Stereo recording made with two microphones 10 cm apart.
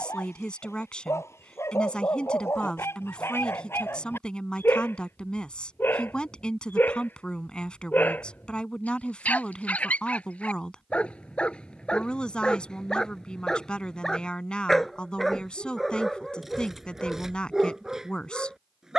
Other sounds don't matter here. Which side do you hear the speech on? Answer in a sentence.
In this clip you hear the speech in the centre.